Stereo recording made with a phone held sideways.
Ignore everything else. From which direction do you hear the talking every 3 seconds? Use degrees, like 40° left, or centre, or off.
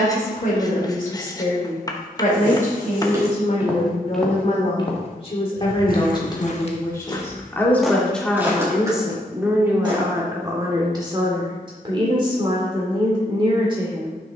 60° left, 40° left, 10° left, 20° right, 30° right.